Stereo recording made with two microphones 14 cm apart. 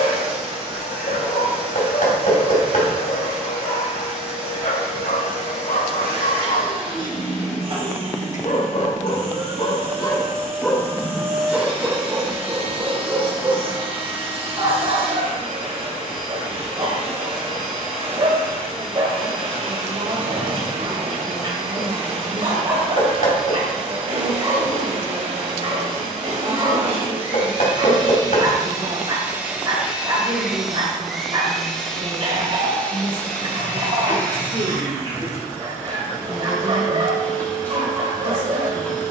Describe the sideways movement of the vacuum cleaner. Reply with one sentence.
In this clip you hear the vacuum cleaner travel towards the left.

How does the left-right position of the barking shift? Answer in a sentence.
In this clip you hear the barking move to the right.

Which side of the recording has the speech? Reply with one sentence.
In this clip you hear the speech on the right.